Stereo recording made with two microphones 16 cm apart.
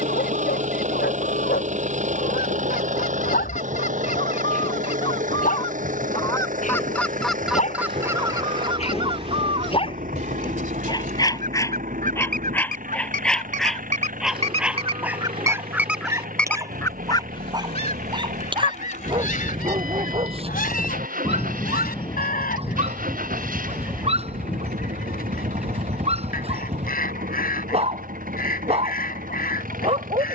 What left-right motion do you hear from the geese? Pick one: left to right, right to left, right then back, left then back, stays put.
right then back.